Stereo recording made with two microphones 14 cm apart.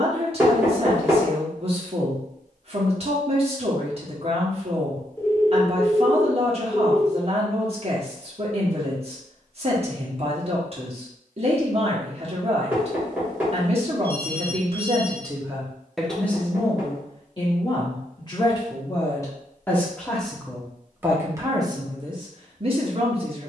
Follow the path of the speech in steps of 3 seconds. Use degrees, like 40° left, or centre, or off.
40° right, 40° right, 40° right, 40° right, 40° right, 10° left, 20° left, 30° right.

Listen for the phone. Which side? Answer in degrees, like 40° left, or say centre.
20° left.